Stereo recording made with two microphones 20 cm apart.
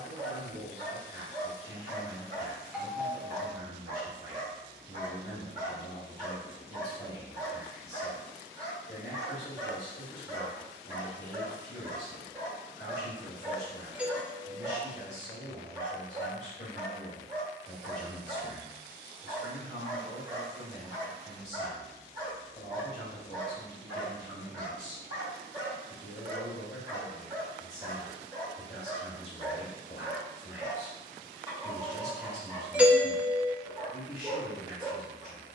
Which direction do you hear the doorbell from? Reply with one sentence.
In this clip you hear the doorbell in the centre.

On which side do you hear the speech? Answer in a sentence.
You can hear the speech on the left.